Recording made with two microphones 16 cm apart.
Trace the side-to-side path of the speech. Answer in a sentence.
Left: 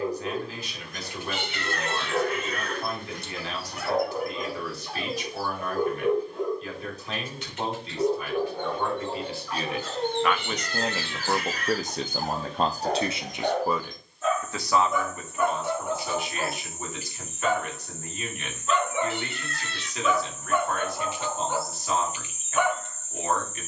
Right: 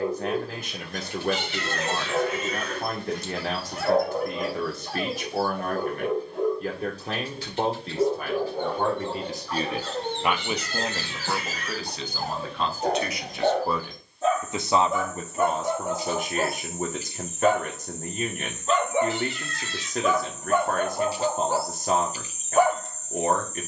In this clip you hear the speech move from right to left and back again.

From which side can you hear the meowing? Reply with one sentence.
In this clip you hear the meowing on the left.